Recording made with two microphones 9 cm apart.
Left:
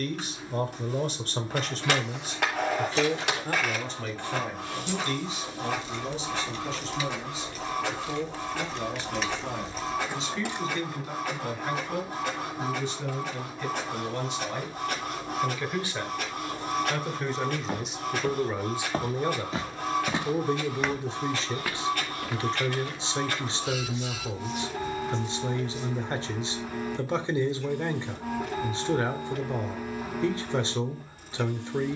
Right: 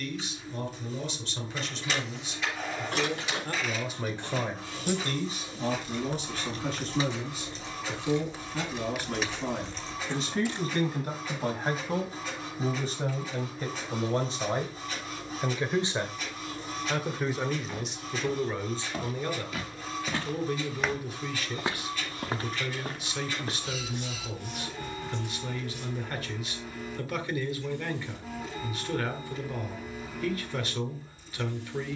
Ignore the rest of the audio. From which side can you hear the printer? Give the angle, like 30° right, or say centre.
70° left.